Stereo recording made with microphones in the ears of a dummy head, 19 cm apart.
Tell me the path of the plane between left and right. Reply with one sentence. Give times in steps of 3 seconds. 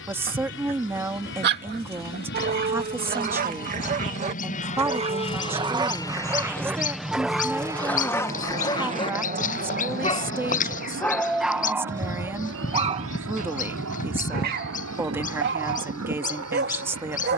You can hear the plane on the left from 0 s, in the centre from 6 s and on the right from 9 s.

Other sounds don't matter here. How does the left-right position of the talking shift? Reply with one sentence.
In this clip you hear the talking stay in one place.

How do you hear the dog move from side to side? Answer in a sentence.
In this clip you hear the dog move from right to left and back again.